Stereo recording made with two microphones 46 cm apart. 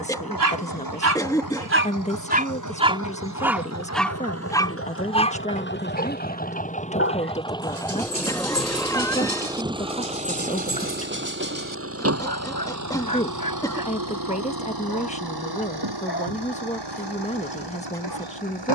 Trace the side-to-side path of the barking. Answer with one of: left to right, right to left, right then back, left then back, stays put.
right to left.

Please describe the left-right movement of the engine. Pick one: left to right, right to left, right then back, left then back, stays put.
left to right.